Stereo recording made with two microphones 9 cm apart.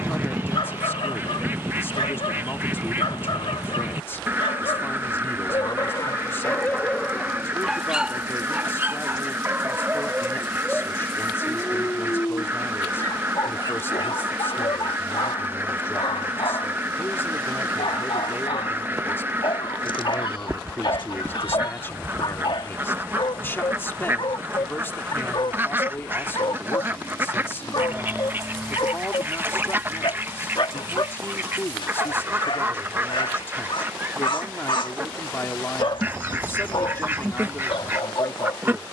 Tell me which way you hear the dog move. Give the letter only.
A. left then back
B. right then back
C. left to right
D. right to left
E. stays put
B.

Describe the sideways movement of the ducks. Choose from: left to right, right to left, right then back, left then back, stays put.
stays put.